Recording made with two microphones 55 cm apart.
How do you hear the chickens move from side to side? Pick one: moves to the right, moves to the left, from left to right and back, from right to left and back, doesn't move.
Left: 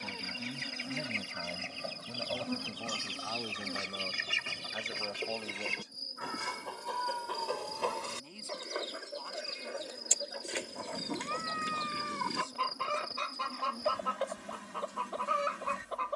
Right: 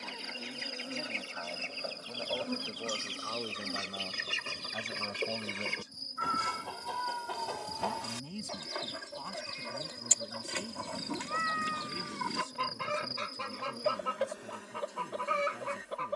moves to the right.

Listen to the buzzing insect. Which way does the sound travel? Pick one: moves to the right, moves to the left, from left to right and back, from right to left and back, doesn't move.
from left to right and back.